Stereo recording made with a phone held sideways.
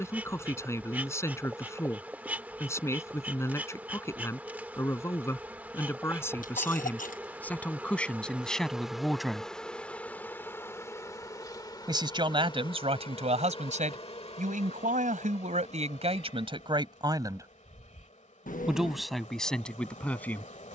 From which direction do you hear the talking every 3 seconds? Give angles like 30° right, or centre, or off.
20° left, 20° left, 10° left, 10° right, 50° right, 40° right, centre.